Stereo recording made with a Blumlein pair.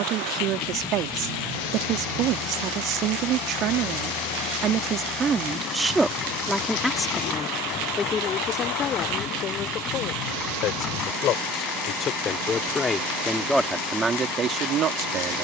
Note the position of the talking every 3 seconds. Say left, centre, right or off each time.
right, right, centre, left, centre.